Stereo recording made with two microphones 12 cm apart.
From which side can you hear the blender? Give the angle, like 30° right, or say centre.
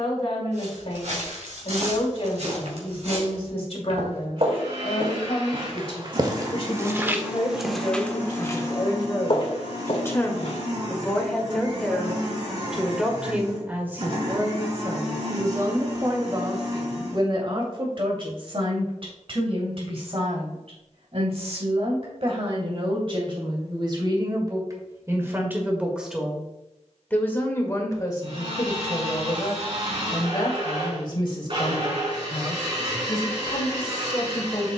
50° right.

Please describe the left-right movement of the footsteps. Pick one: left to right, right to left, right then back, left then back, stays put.
right to left.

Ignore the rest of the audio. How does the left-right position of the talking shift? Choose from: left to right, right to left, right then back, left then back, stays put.
right then back.